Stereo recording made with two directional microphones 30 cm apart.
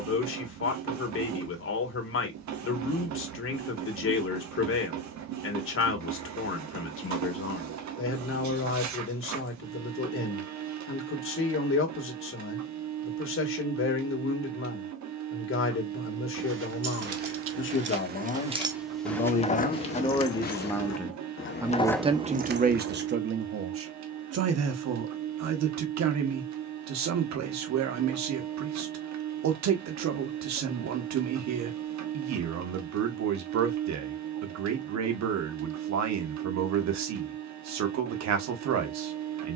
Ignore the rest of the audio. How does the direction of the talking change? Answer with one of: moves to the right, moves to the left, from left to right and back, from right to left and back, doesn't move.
moves to the right.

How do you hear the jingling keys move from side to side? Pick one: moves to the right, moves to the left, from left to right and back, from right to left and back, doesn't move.
from right to left and back.